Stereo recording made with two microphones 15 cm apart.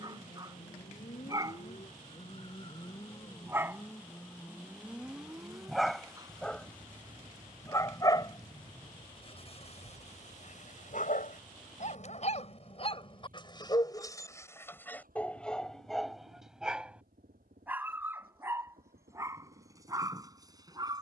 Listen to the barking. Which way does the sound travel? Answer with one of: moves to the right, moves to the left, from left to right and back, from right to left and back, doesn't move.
from right to left and back.